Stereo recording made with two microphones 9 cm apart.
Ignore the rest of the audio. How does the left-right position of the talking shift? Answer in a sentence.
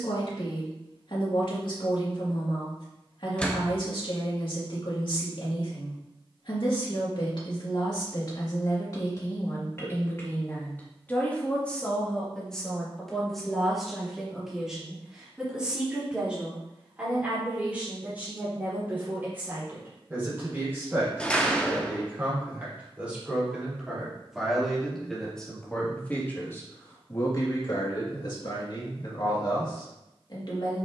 In this clip you hear the talking go right and come back.